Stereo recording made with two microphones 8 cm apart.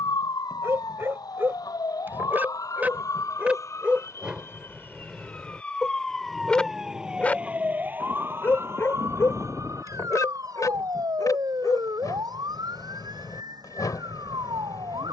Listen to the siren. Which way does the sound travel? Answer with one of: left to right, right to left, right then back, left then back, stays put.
left to right.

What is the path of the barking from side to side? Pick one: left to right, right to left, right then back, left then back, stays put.
right to left.